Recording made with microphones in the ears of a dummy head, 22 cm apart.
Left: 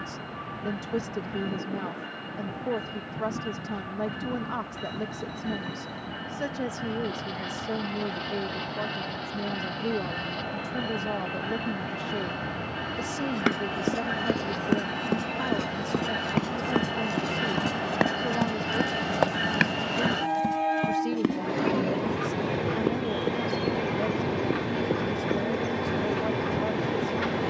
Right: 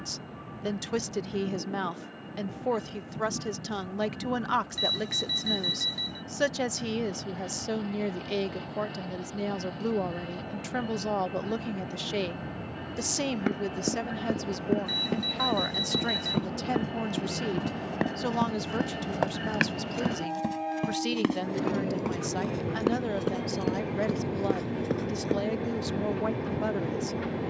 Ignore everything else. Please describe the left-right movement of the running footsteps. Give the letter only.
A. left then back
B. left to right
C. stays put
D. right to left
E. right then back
B.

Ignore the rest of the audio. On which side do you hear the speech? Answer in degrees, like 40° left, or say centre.
80° right.